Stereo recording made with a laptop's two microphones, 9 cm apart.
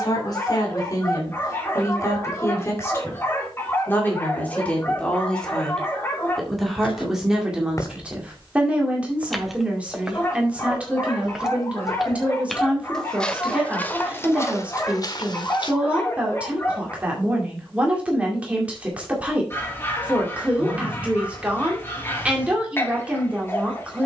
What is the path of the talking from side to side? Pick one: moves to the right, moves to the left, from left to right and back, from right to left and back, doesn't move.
moves to the right.